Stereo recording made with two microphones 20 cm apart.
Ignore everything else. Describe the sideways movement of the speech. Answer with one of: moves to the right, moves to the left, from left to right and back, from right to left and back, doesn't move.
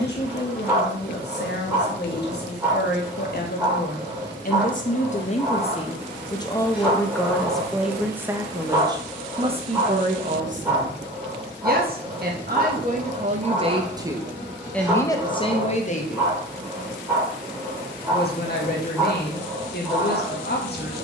from left to right and back.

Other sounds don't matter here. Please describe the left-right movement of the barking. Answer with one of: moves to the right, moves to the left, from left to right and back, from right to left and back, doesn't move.
doesn't move.